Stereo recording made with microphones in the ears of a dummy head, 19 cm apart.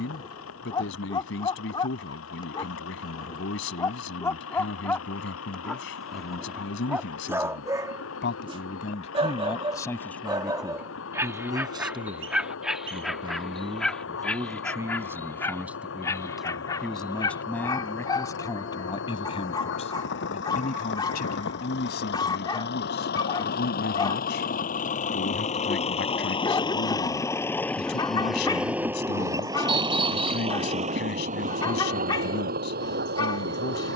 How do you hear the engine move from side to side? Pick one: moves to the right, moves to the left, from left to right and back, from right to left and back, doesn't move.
moves to the right.